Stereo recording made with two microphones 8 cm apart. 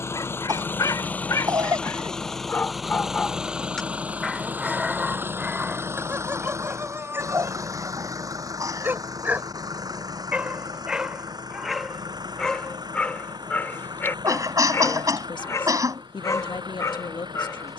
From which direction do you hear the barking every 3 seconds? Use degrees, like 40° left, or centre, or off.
40° left, 10° right, 30° right, 10° right, 20° left, 40° left.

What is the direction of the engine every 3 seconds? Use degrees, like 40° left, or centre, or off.
20° left, 20° right, 40° right, 50° right, 60° right, 60° right.